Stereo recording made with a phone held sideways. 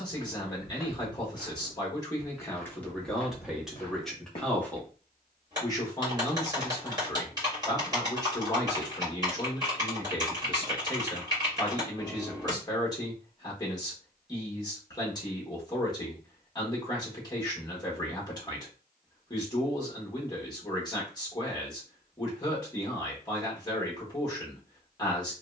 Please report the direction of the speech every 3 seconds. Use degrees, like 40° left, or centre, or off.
20° left, 10° left, 20° left, 20° left, 20° left, 20° left, 20° left, 20° left, 20° left.